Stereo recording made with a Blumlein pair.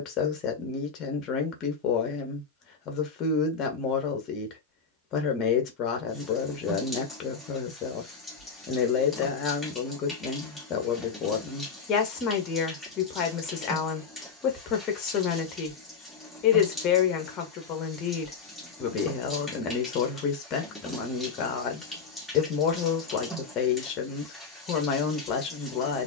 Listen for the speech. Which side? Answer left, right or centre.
left.